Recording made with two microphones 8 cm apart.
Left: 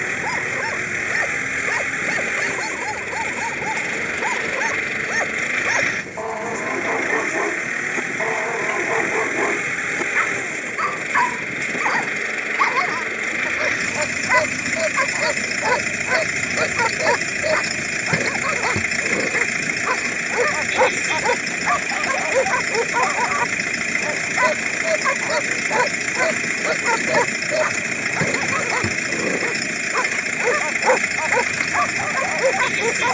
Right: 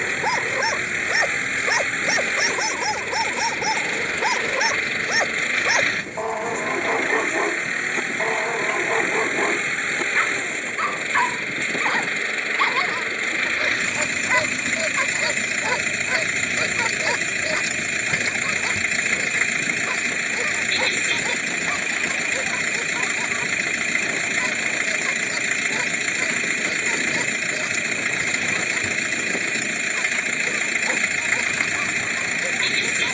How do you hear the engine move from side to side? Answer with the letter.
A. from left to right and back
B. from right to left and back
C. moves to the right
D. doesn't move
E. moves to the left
D.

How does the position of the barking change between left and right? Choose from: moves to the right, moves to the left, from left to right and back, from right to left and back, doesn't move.
moves to the left.